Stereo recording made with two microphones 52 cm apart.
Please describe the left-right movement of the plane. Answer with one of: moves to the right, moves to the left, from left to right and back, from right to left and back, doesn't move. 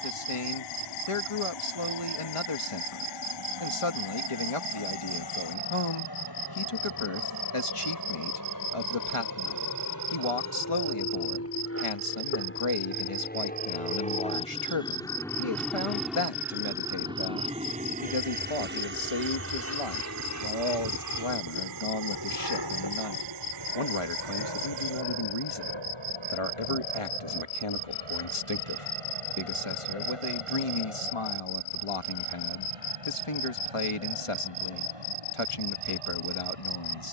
moves to the right.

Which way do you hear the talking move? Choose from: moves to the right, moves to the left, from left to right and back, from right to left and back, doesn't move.
doesn't move.